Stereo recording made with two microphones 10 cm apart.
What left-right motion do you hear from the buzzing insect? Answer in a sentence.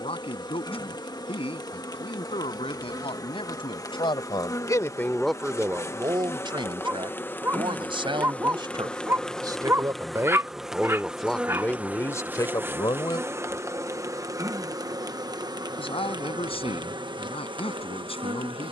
You can hear the buzzing insect move to the right.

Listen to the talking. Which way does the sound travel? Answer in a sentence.
In this clip you hear the talking move from left to right and back again.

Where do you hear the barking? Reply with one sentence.
In this clip you hear the barking on the right.